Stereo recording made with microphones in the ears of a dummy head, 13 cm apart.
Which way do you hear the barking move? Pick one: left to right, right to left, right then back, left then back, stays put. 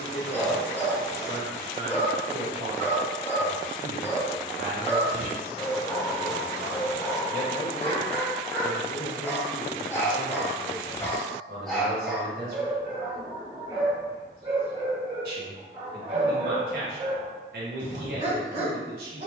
left to right.